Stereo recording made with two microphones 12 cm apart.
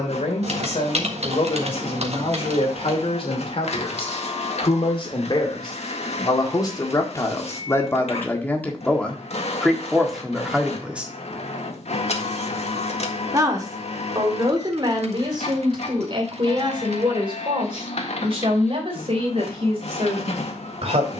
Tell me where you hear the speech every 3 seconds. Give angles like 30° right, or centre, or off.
60° left, 50° left, 20° left, centre, 30° right, 50° right, 50° right.